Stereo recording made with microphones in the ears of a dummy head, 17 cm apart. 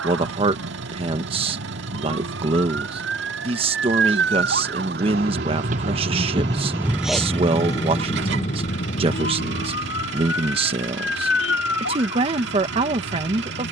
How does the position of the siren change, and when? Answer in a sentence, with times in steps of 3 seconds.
You can hear the siren on the right from 0 s, in the centre from 6 s and on the left from 9 s.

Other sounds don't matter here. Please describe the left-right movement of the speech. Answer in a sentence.
In this clip you hear the speech stay in one place.